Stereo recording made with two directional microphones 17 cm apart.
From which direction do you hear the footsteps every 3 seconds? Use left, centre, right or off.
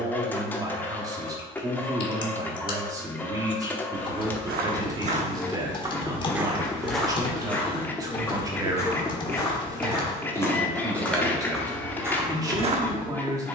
off, right, centre, centre, right.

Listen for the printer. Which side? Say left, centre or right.
centre.